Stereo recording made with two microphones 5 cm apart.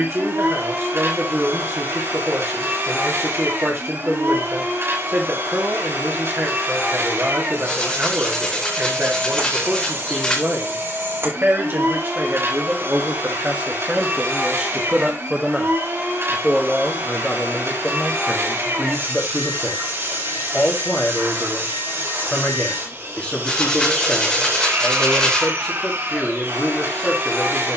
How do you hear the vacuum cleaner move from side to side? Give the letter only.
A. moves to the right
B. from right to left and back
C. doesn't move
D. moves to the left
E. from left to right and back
C.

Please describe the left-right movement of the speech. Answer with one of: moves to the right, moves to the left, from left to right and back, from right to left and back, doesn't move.
moves to the left.